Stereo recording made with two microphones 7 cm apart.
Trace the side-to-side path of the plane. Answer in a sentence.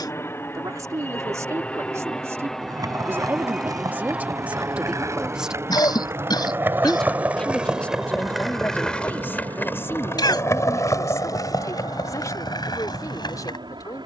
You can hear the plane move to the right.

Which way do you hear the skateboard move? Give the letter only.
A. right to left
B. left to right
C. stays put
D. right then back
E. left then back
A.